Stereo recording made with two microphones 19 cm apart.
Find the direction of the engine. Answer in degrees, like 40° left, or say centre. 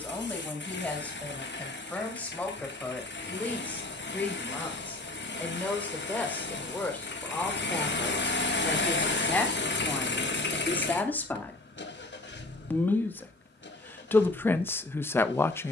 80° left.